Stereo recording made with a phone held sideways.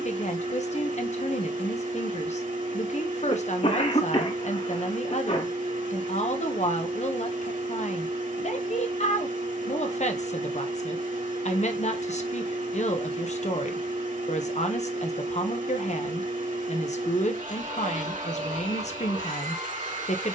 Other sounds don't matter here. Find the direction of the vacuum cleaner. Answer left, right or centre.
right.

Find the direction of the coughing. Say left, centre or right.
left.